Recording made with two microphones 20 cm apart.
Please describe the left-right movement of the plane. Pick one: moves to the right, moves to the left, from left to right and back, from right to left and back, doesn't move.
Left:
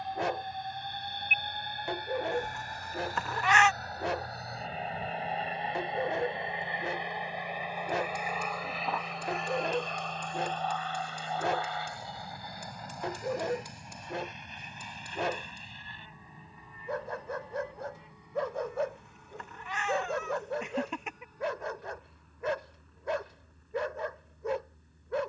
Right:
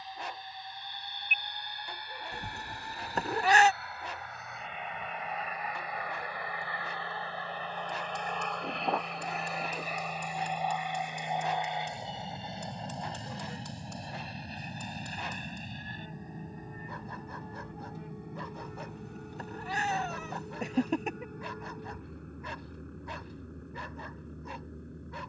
moves to the right.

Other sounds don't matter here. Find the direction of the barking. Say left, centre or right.
left.